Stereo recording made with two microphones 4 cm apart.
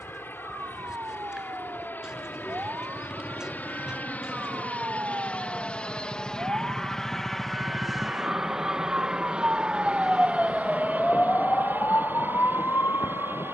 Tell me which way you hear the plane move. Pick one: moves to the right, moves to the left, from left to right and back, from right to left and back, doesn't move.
moves to the right.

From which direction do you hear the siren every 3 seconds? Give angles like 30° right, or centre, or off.
60° right, 60° right, 40° right, 10° left, 70° left.